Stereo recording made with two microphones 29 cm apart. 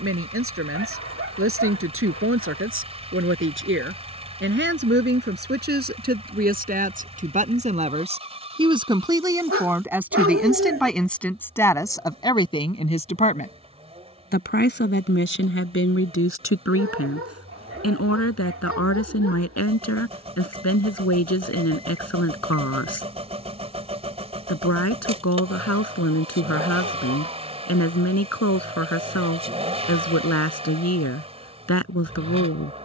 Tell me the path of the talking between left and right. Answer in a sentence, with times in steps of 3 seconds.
You can hear the talking on the right from 0 s, in the centre from 9 s and on the left from 12 s.